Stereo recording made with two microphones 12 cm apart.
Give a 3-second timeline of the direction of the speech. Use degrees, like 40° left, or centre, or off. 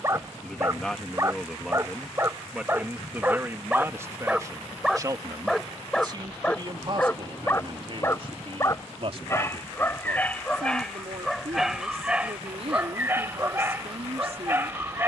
centre, 20° right, 40° right, 60° right, 60° right.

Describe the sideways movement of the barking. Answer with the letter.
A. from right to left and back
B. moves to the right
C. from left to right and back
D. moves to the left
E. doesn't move
A.